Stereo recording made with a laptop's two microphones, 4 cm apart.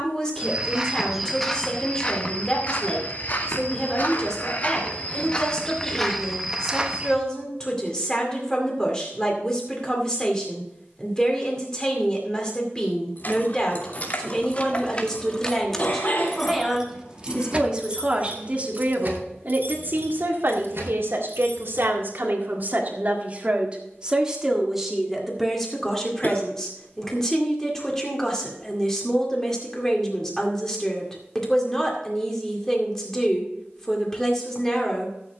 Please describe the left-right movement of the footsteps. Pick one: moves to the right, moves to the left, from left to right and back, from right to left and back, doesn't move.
from right to left and back.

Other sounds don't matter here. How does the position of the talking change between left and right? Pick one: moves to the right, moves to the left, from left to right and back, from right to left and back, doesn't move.
from left to right and back.